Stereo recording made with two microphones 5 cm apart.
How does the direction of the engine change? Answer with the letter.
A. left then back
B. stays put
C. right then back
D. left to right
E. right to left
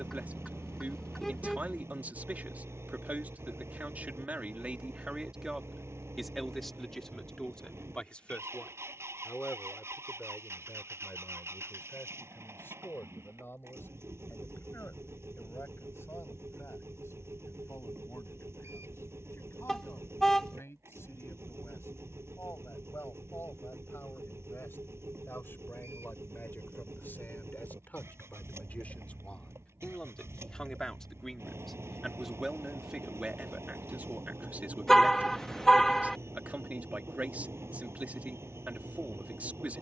B.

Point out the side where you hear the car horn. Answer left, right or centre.
centre.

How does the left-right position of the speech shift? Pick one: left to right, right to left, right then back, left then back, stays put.
left then back.